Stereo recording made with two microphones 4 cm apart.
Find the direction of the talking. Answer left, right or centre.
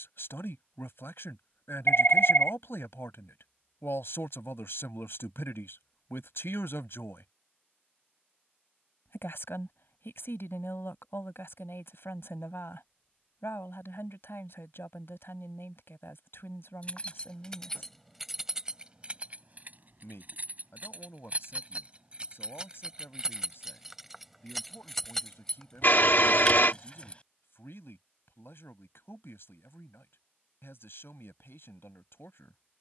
left.